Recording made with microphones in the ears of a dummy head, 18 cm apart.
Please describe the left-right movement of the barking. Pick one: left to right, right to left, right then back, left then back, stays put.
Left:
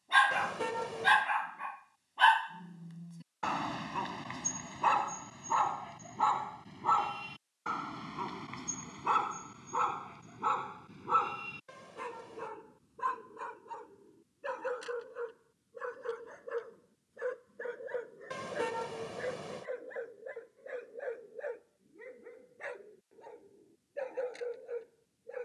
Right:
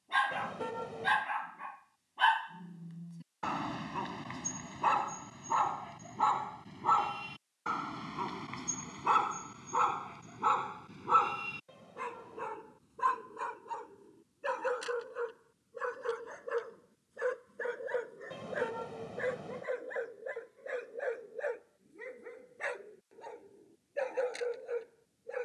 left to right.